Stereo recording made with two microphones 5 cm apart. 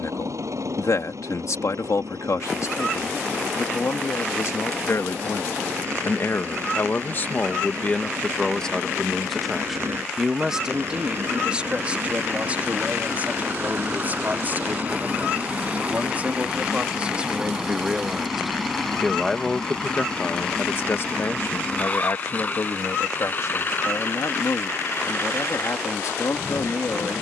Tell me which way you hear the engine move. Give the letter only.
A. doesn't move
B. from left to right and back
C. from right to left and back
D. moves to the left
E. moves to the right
D.